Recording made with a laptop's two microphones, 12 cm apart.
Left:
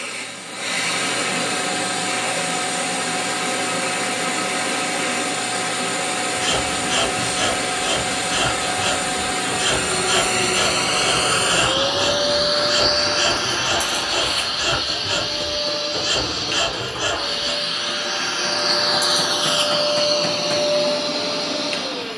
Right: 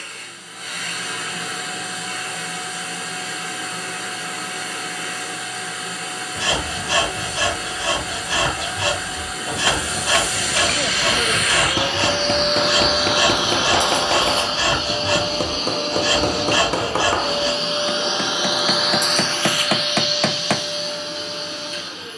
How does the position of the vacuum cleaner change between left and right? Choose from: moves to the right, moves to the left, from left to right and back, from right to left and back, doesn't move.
from left to right and back.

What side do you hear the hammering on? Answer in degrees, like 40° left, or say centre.
70° right.